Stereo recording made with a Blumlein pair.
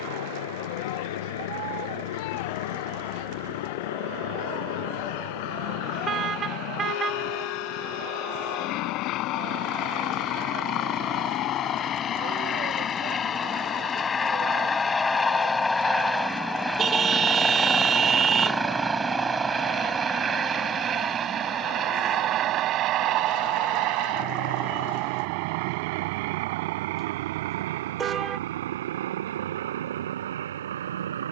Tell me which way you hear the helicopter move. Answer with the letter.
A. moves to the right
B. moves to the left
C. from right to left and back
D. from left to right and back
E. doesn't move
A.